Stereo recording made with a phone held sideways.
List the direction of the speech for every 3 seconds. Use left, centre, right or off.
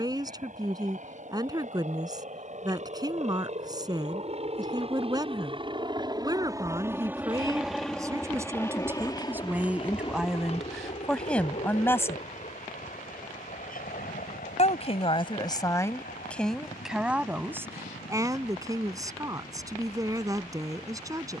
right, right, right, centre, left, centre, right.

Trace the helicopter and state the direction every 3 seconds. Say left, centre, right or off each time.
right, right, centre, left, left, left, left.